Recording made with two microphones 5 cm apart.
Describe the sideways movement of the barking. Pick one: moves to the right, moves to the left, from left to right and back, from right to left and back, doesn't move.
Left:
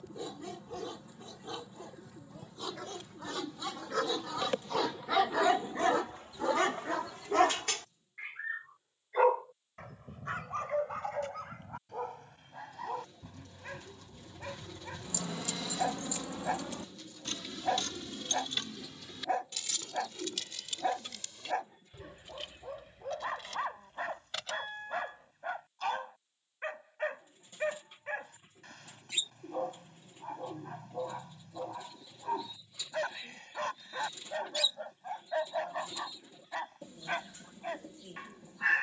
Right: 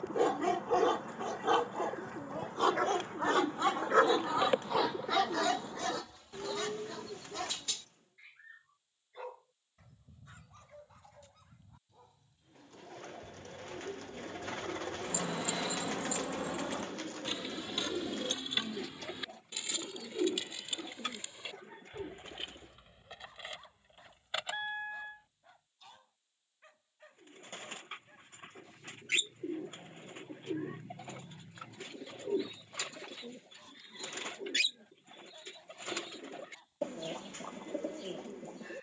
moves to the left.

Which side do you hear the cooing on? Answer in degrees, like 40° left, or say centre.
60° right.